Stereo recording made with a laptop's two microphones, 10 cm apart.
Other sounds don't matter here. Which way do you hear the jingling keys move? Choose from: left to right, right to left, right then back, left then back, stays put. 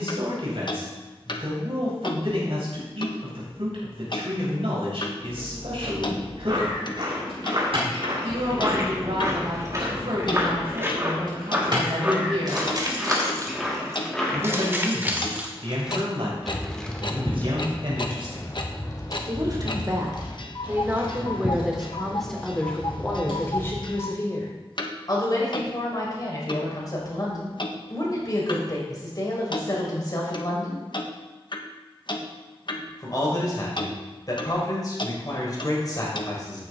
right to left.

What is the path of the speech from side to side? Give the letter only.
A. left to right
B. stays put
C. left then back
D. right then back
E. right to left
E.